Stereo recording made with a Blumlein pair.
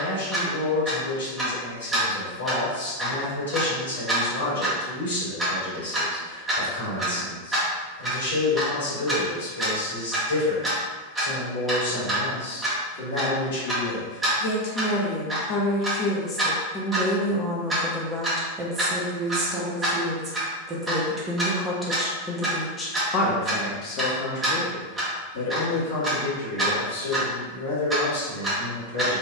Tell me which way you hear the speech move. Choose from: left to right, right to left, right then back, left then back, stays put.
right then back.